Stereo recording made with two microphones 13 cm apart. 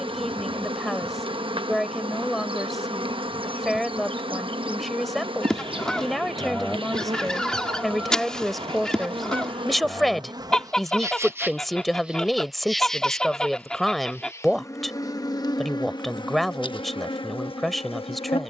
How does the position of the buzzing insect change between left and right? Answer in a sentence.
You can hear the buzzing insect move to the left.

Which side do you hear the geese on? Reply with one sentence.
In this clip you hear the geese in the centre.